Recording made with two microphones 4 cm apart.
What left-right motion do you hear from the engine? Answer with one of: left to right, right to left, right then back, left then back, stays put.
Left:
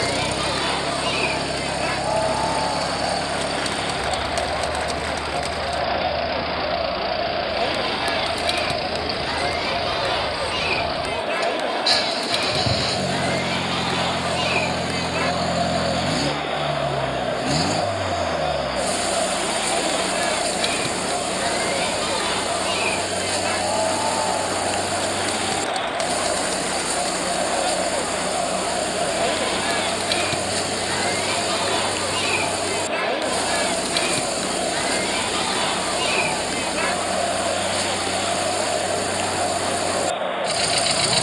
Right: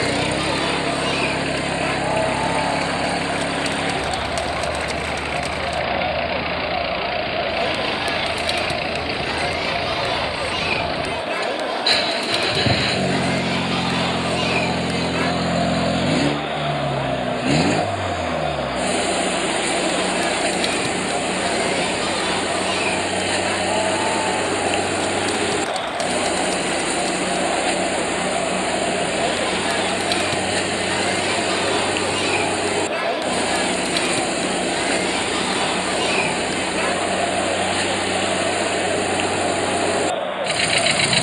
stays put.